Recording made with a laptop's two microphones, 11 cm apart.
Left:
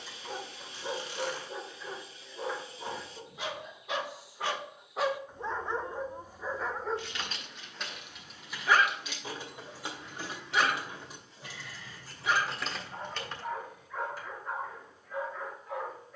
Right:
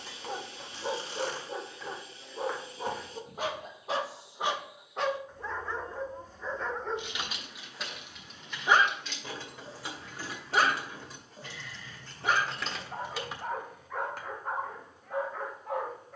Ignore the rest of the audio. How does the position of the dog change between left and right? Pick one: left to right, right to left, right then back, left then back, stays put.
left then back.